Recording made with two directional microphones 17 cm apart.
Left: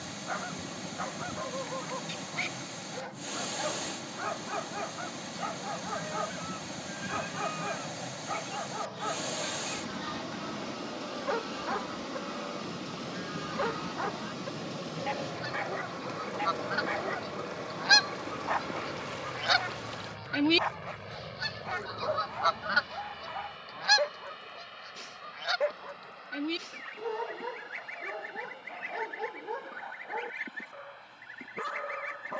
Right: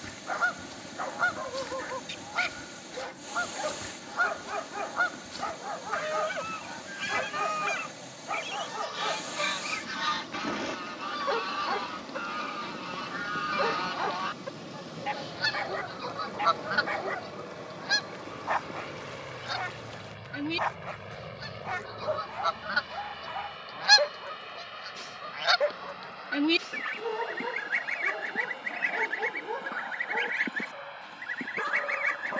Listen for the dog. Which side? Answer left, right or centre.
centre.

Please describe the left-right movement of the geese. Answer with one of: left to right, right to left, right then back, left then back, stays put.
left then back.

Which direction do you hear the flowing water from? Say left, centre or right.
left.